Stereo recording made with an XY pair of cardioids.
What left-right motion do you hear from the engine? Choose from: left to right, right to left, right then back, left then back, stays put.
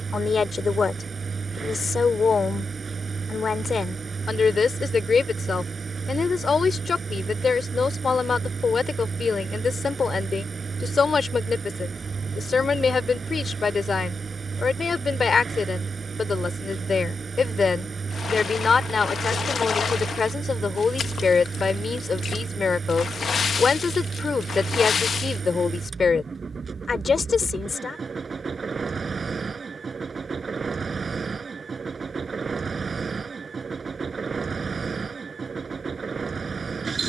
stays put.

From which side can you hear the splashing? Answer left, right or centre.
left.